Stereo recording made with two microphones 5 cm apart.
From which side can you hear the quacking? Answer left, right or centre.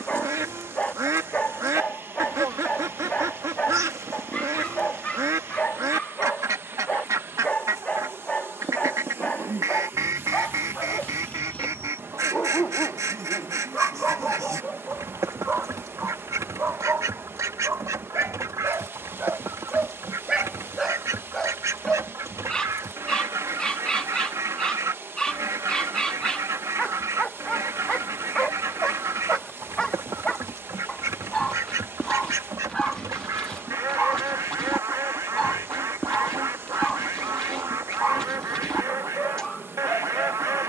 right.